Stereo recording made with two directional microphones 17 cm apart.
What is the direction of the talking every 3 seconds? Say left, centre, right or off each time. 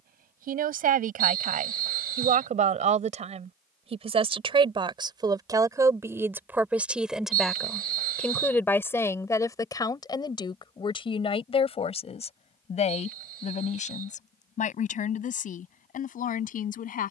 right, right, centre, left, left, left.